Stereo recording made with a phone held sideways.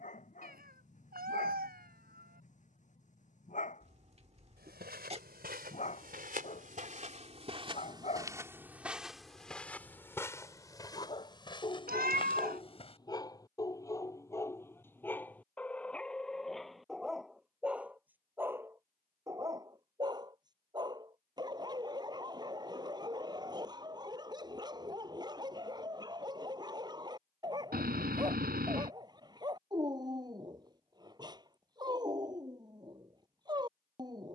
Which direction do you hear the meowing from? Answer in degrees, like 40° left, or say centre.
70° right.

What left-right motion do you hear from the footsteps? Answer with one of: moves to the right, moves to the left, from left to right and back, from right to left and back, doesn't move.
moves to the left.